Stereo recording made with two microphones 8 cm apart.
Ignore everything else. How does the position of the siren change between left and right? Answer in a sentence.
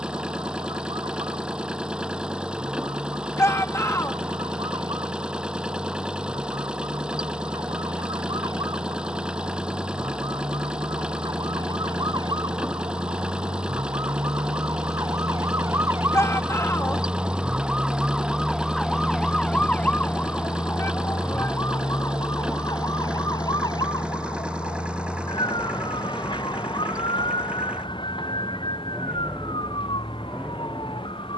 In this clip you hear the siren move to the left.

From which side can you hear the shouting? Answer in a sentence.
You can hear the shouting on the left.